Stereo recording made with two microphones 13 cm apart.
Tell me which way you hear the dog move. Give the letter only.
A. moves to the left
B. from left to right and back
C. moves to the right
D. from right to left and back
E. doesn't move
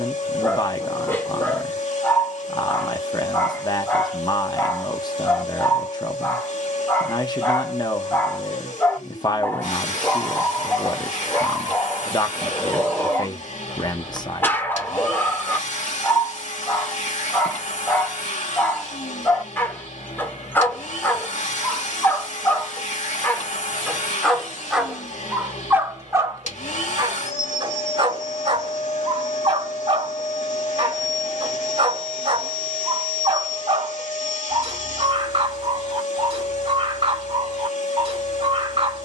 C.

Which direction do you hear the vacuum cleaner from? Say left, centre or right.
left.